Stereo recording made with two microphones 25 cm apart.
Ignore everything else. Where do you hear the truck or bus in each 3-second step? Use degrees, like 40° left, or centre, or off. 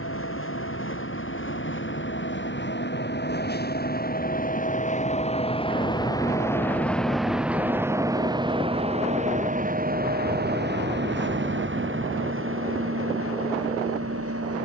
50° left, 30° left, centre, 40° right, 60° right.